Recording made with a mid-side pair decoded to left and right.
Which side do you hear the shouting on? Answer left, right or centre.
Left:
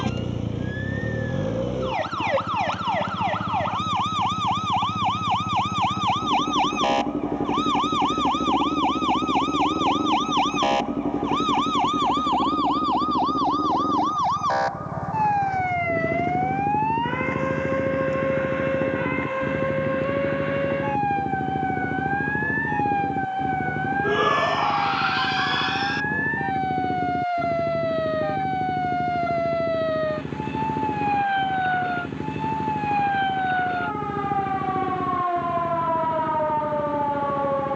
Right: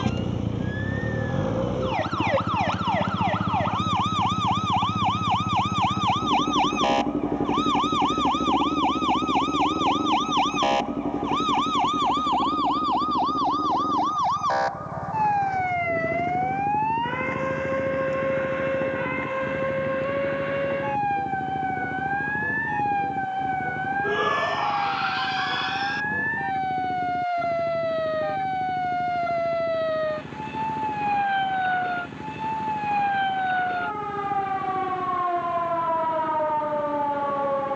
left.